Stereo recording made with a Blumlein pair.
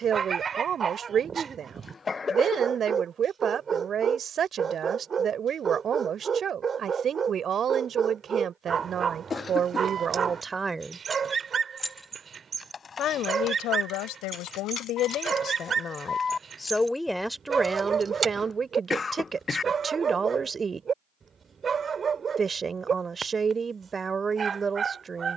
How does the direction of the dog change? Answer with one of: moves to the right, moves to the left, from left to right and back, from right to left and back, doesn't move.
doesn't move.